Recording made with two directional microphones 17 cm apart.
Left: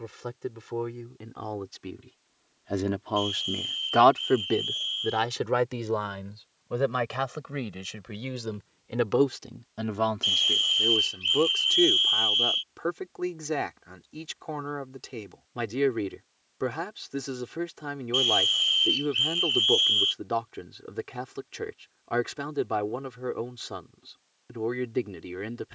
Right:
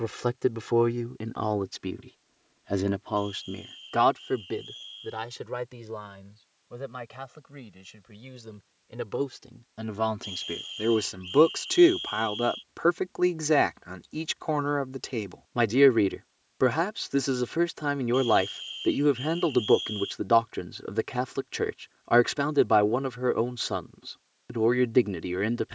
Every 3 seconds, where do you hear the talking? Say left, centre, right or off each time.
right, left, left, centre, right, right, right, right, right.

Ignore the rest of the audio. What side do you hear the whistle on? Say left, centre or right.
left.